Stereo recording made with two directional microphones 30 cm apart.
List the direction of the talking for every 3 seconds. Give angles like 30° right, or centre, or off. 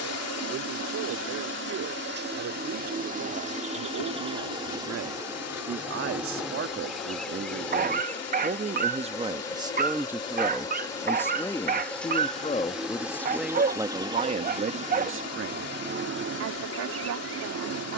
70° right, 60° right, 40° right, centre, centre, 60° right.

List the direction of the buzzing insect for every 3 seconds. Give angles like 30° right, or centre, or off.
40° right, 20° right, centre, 10° left, 10° right, 40° right.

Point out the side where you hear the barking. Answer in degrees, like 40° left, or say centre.
30° right.